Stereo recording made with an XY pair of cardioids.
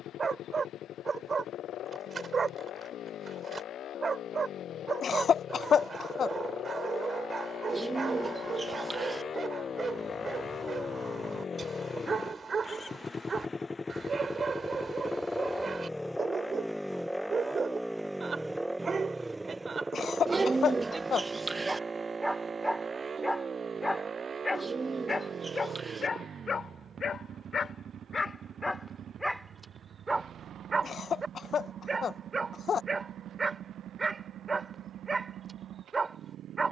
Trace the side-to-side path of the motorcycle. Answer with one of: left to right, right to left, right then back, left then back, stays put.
left to right.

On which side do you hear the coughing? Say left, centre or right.
left.